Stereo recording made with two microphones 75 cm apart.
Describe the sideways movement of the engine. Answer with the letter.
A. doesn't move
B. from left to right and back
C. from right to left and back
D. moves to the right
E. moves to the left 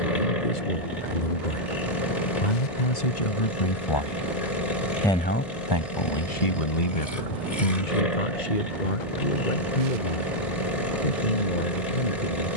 A.